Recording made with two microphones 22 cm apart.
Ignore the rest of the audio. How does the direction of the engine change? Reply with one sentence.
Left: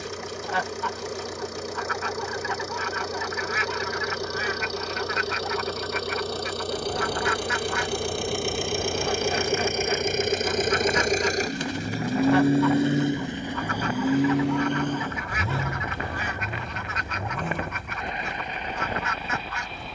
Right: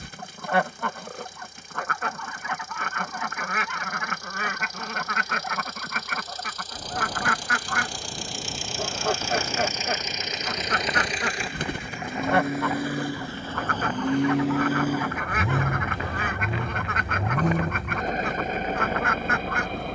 You can hear the engine go from the left side to the right.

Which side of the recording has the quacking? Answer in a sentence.
In this clip you hear the quacking on the right.